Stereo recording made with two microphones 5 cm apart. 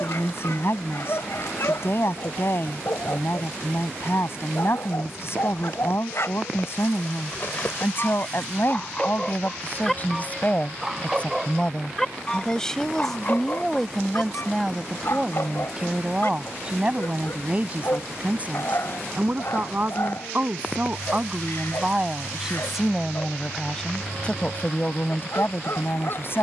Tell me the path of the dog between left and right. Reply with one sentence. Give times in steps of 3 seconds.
In this clip you hear the dog on the left from 0 s, in the centre from 9 s and on the left from 12 s.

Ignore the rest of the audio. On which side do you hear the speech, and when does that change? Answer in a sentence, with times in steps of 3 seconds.
In this clip you hear the speech on the left from 0 s, in the centre from 12 s, on the right from 15 s, in the centre from 21 s and on the left from 24 s.